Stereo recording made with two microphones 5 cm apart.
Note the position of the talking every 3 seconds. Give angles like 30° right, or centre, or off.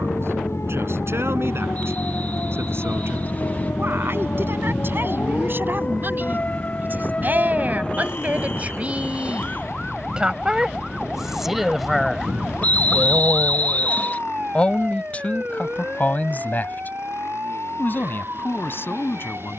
60° right, 50° right, 40° right, 10° right, 10° left, 40° left, 50° left.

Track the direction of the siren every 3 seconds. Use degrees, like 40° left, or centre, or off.
60° left, 40° left, 30° left, centre, 20° right, 40° right, 50° right.